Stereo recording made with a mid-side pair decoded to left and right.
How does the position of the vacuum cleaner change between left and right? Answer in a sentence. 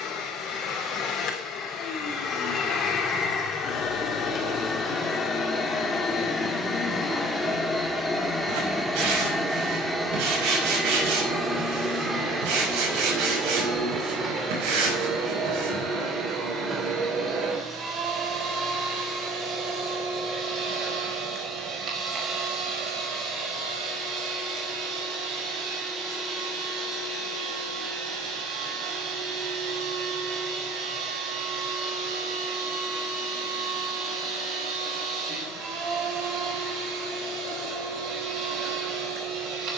You can hear the vacuum cleaner move from left to right.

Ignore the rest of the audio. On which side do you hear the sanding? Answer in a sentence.
You can hear the sanding on the right.